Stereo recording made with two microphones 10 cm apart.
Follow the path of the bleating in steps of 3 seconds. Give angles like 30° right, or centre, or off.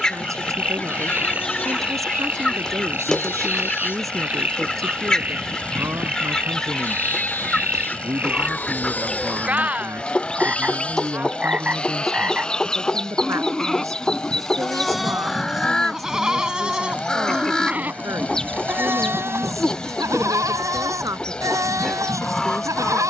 20° left, 20° left, 20° left, 10° left, centre, 10° right, 30° right, 40° right.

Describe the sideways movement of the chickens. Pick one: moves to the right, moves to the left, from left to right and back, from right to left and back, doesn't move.
doesn't move.